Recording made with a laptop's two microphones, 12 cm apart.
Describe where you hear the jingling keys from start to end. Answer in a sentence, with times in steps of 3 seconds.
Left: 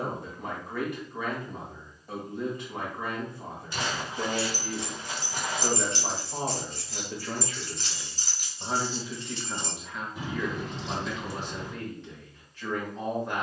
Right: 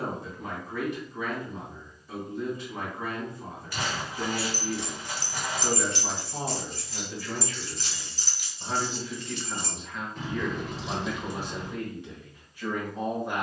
In this clip you hear the jingling keys not at all from 0 s, in the centre from 3 s, on the left from 6 s, in the centre from 9 s and not at all from 12 s.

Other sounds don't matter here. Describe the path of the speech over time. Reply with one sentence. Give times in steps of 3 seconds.
You can hear the speech on the left from 0 s and in the centre from 9 s.